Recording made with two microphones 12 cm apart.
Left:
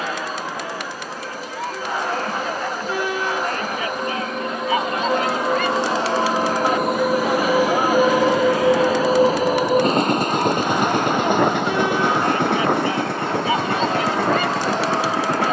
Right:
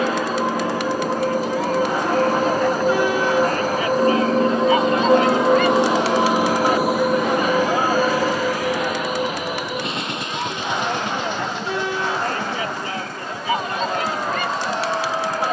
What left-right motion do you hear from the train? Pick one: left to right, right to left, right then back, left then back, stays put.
right to left.